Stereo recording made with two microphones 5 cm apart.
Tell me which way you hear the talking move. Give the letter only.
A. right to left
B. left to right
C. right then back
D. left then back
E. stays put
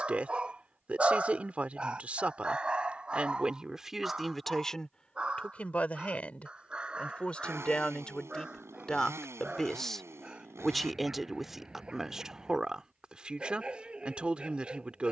D.